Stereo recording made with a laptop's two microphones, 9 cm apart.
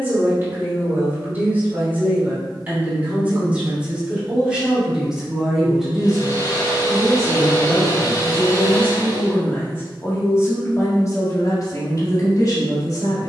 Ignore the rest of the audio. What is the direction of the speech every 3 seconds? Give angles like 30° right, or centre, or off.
20° right, 10° right, 10° left, 30° left, 50° left.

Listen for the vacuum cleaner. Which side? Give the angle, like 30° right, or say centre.
50° left.